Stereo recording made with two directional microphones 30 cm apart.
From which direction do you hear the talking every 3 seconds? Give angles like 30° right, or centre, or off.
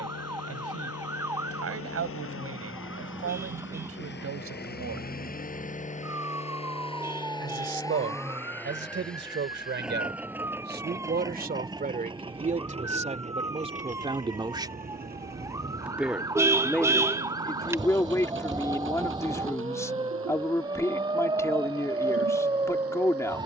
50° right, 50° right, 40° right, 30° right, 20° right, centre, 10° left, 10° left.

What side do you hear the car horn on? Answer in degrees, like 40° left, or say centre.
10° right.